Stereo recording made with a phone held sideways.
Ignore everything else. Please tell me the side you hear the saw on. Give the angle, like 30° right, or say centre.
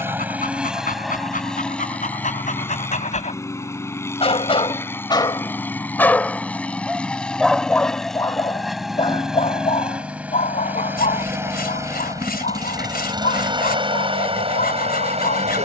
80° left.